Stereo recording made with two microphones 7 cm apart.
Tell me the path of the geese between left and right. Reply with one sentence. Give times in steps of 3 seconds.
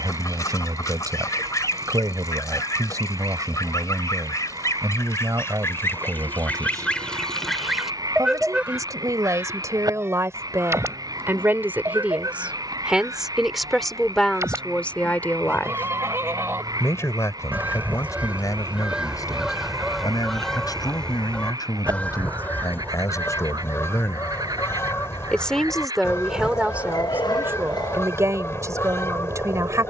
You can hear the geese on the left from 0 s, in the centre from 6 s, on the right from 9 s, in the centre from 18 s and on the left from 21 s.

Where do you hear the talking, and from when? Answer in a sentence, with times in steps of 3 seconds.
In this clip you hear the talking on the right from 0 s, in the centre from 12 s, on the left from 15 s, in the centre from 24 s and on the right from 27 s.